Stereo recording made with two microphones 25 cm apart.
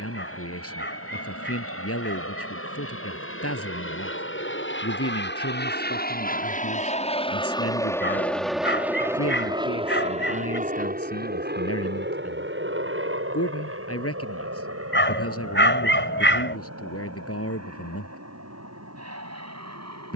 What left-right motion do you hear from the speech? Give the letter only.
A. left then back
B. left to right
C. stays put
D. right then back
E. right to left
C.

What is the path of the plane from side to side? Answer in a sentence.
In this clip you hear the plane travel towards the right.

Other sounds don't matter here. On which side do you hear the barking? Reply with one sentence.
In this clip you hear the barking on the left.